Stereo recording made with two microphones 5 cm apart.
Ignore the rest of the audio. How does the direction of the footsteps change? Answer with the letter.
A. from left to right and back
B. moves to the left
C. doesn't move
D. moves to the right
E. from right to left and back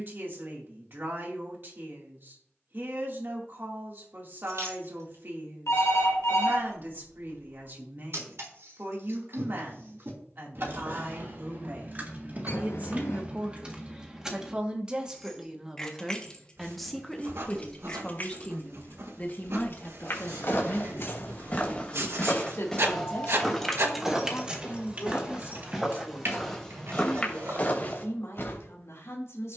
A.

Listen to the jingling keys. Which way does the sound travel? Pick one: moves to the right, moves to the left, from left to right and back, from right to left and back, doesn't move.
from right to left and back.